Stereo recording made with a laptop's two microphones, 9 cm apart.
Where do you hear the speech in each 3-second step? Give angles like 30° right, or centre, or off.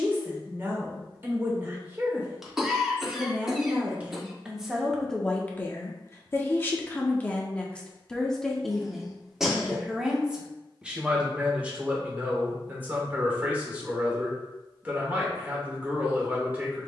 30° right, centre, 10° left, 10° right, 20° right, 20° right.